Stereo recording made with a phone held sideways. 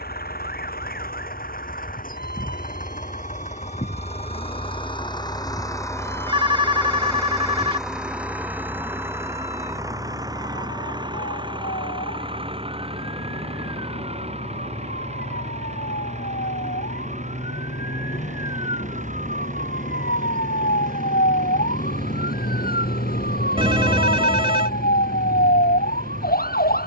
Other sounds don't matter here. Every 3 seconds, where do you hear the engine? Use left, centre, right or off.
left, left, centre, right, right, right, right, right, right.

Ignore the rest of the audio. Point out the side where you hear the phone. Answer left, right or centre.
right.